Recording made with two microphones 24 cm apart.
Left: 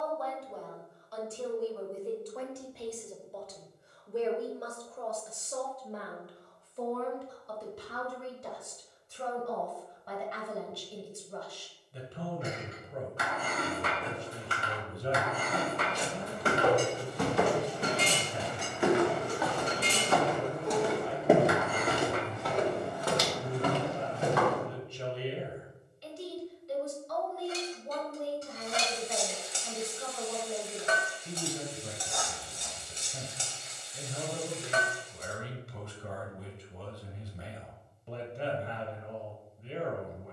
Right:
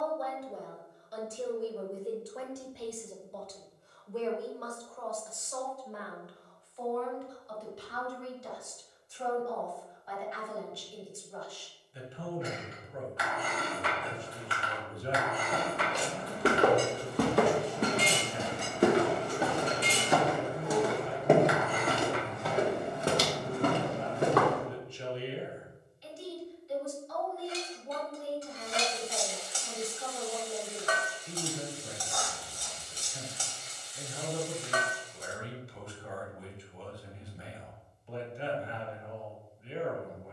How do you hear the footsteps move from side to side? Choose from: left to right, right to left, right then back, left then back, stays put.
left then back.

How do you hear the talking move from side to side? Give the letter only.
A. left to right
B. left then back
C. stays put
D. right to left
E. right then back
D.